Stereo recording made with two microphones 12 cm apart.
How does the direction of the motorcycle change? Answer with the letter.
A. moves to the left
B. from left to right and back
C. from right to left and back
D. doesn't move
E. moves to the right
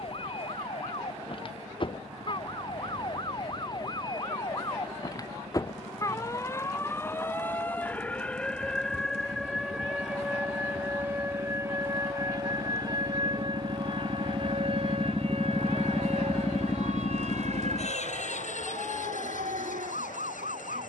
A.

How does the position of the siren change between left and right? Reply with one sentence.
In this clip you hear the siren move from left to right.